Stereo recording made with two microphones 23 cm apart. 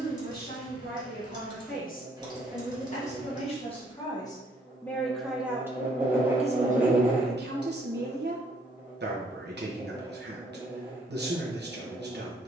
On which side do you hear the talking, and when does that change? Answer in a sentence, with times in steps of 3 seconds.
In this clip you hear the talking on the left from 0 s, in the centre from 3 s and on the right from 6 s.